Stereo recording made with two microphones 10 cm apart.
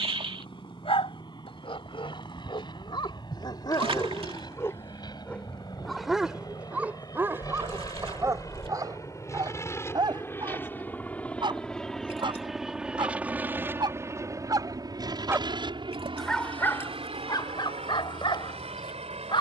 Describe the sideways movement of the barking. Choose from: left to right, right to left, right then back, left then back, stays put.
right then back.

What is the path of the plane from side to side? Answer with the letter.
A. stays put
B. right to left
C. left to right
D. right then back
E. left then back
C.